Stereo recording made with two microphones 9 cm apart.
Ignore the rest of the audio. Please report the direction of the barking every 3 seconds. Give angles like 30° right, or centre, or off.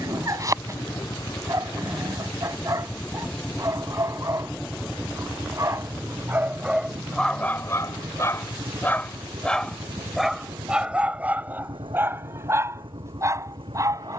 30° right, 30° right, 10° left, 10° right, 30° right.